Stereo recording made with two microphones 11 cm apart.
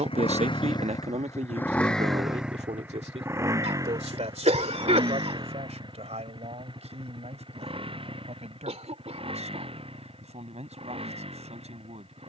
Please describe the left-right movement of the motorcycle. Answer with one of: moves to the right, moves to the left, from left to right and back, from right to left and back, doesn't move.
moves to the right.